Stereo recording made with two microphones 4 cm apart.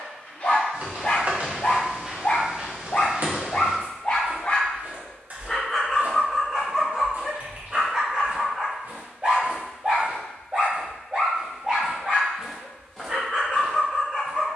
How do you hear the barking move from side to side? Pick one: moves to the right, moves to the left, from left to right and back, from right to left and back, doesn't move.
moves to the right.